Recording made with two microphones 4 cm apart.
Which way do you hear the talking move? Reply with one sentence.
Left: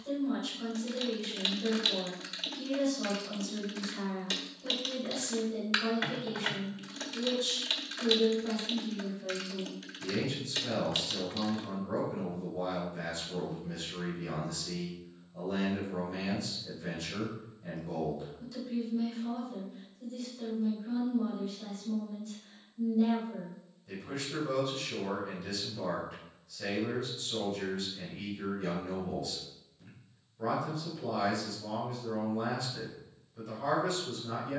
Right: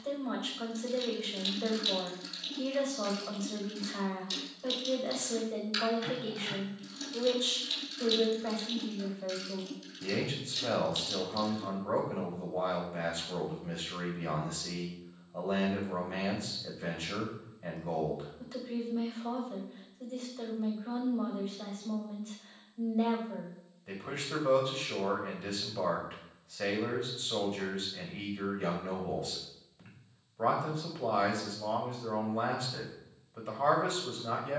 In this clip you hear the talking stay in one place.